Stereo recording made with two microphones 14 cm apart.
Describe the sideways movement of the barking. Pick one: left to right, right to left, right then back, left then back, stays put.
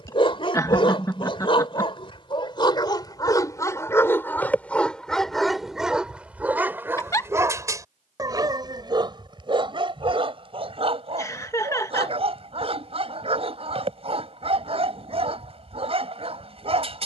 left to right.